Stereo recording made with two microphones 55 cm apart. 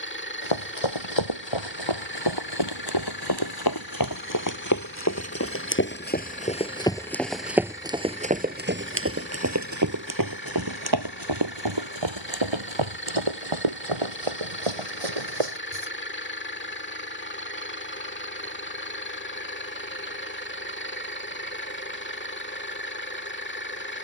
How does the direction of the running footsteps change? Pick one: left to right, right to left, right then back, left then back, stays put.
left to right.